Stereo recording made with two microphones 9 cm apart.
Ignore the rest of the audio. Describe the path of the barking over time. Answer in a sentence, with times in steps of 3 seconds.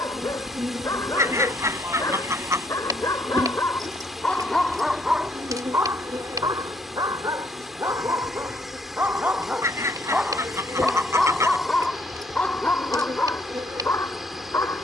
You can hear the barking on the left from 0 s, in the centre from 3 s, on the right from 6 s, in the centre from 9 s and on the left from 12 s.